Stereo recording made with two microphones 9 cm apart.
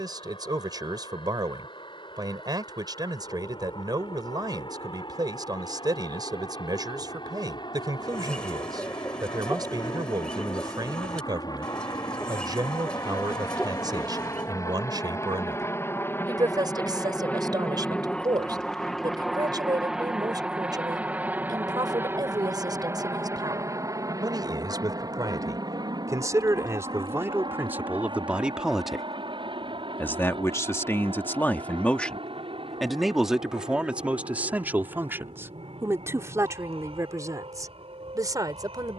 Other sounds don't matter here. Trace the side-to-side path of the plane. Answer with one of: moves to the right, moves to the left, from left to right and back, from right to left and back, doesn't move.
moves to the right.